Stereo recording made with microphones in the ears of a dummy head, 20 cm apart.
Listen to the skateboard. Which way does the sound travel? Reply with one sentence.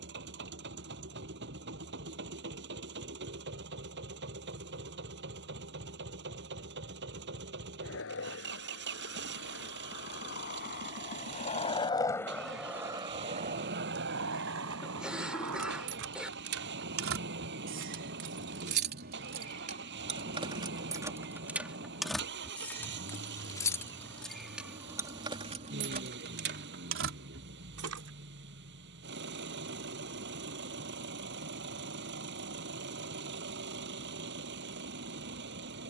You can hear the skateboard move from left to right.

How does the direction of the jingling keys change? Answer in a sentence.
You can hear the jingling keys go left and come back.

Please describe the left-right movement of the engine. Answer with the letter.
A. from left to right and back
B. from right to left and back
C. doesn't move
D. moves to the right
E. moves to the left
C.